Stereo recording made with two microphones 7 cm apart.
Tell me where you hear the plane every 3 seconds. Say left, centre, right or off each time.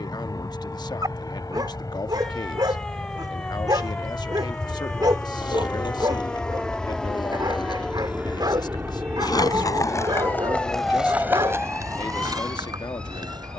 left, left, centre, right, right.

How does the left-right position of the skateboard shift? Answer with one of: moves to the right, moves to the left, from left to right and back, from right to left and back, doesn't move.
moves to the right.